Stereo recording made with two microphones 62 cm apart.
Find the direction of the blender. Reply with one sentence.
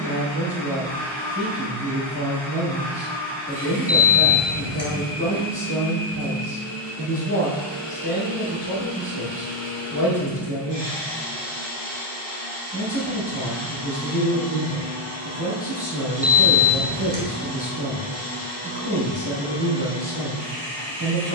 You can hear the blender on the right.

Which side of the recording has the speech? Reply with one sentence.
In this clip you hear the speech on the right.